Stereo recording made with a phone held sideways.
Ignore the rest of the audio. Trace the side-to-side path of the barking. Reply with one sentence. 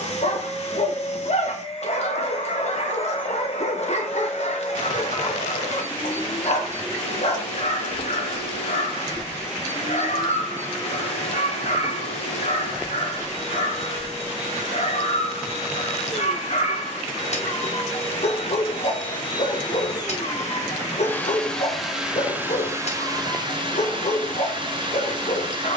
You can hear the barking stay put.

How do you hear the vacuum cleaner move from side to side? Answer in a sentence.
In this clip you hear the vacuum cleaner move to the right.